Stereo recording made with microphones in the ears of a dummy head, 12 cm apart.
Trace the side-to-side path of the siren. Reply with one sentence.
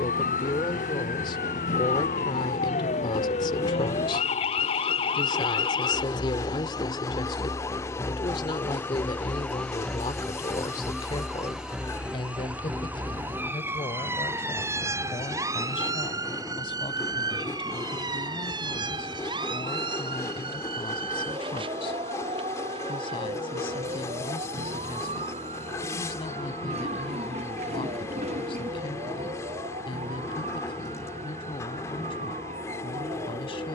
In this clip you hear the siren move to the right.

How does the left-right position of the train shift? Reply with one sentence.
You can hear the train stay in one place.